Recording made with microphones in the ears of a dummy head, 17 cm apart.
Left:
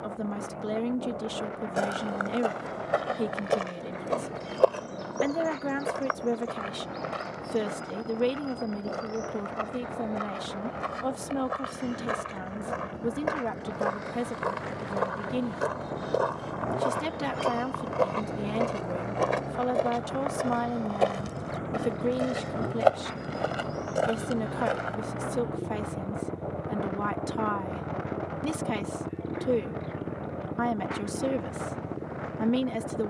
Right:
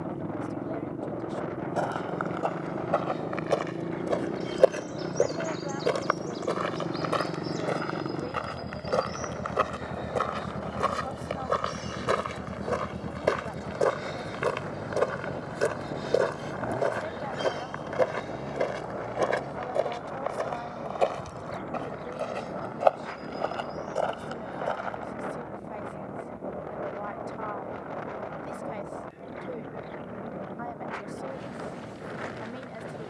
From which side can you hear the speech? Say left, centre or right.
left.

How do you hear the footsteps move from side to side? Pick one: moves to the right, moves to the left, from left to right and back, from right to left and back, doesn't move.
from left to right and back.